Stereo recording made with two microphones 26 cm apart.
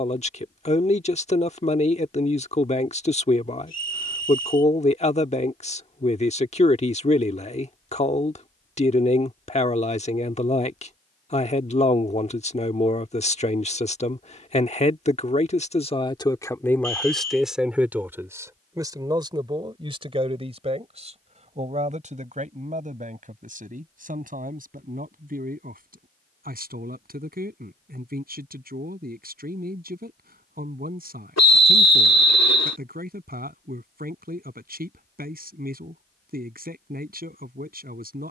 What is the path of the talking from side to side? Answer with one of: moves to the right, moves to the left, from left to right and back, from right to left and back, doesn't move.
moves to the right.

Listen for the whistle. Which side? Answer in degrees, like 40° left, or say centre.
80° left.